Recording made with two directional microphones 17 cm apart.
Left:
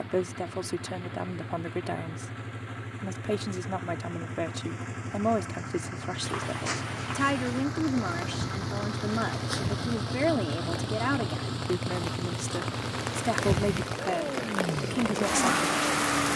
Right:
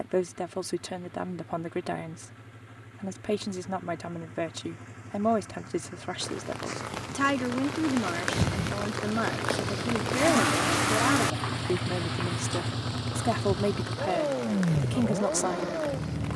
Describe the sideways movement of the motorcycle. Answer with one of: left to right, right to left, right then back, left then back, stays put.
left to right.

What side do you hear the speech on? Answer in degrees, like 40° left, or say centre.
centre.